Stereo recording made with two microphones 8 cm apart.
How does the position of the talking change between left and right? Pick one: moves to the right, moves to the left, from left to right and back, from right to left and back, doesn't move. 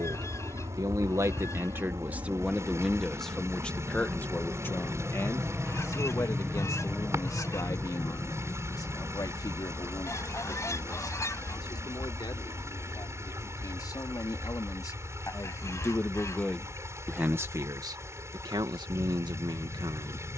from right to left and back.